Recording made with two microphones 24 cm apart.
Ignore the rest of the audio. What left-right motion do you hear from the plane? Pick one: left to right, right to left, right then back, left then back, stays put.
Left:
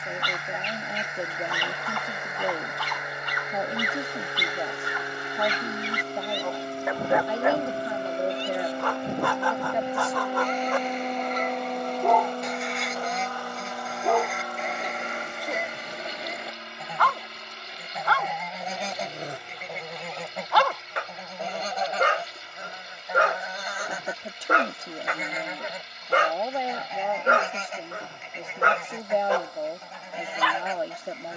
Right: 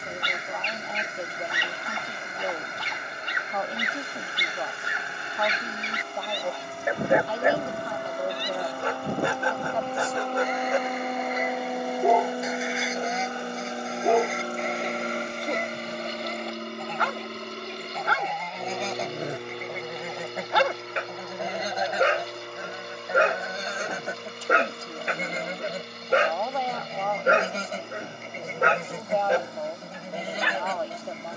left to right.